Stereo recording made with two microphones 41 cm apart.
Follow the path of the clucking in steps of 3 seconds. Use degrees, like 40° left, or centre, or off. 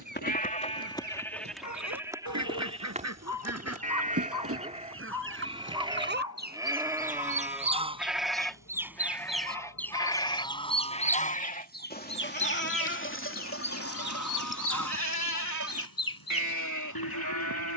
40° right, 30° right, 20° right, 10° left, 40° left, 60° left.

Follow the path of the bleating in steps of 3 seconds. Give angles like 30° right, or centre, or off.
centre, 20° right, centre, 10° left, 30° left, 50° left.